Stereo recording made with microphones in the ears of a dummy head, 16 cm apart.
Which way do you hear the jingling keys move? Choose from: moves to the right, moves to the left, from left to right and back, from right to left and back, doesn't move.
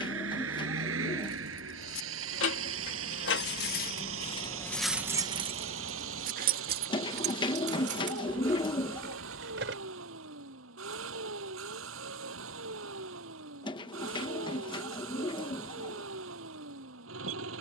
moves to the right.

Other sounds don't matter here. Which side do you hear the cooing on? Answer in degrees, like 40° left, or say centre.
30° left.